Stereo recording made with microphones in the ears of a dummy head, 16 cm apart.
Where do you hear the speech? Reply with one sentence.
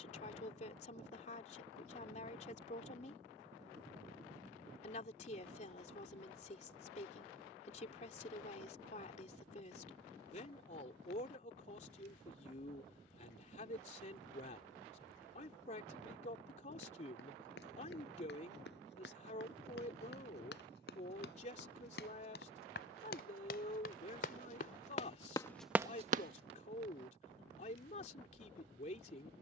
In this clip you hear the speech on the left.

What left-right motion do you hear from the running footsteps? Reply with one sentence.
In this clip you hear the running footsteps go from the left side to the right.